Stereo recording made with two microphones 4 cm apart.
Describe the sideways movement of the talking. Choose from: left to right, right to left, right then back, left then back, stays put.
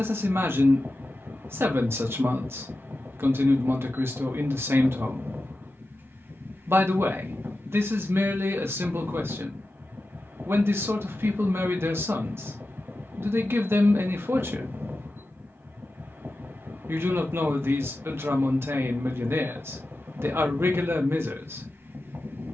stays put.